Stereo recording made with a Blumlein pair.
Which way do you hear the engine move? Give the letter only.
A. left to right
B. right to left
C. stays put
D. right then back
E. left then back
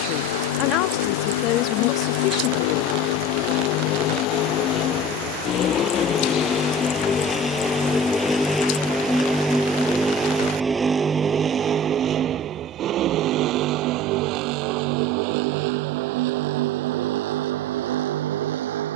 A.